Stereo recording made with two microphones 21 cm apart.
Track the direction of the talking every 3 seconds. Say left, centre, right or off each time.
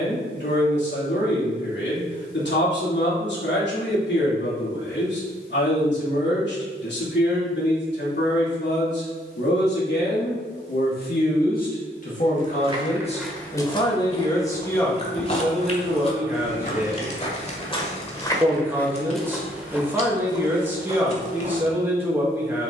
left, left, left, left, left, centre, centre, centre.